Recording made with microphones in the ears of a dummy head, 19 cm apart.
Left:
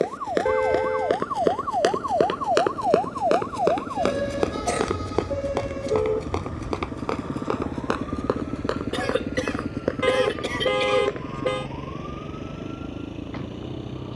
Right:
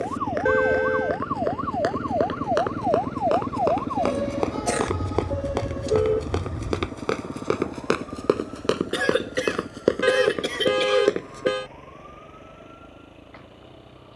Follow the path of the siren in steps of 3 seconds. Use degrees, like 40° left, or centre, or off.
30° right, 20° left, 40° left, 60° left, 60° left.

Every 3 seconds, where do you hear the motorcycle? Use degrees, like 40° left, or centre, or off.
40° right, 20° right, 20° left, 40° left, 60° left.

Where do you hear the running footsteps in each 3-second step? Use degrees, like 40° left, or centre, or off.
40° left, 10° left, 30° right, 50° right, off.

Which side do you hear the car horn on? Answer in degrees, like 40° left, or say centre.
20° right.